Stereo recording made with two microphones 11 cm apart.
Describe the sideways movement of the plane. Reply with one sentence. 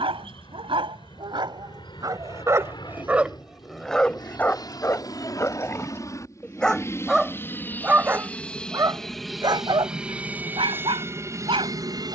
You can hear the plane go from the left side to the right.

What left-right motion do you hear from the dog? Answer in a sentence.
You can hear the dog go left and come back.